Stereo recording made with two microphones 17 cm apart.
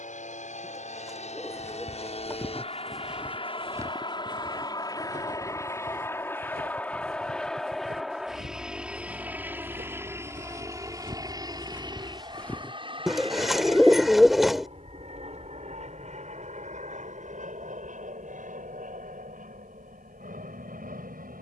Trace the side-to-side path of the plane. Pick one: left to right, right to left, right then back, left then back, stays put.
left to right.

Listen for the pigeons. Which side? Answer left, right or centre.
centre.